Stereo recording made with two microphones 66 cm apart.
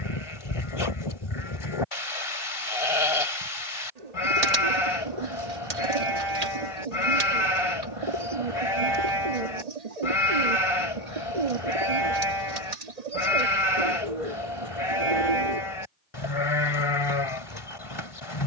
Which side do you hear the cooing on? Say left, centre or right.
right.